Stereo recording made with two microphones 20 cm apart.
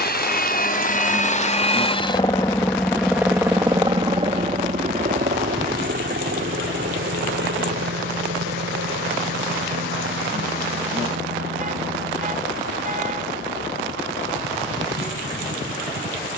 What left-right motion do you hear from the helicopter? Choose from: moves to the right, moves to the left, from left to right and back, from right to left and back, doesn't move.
moves to the right.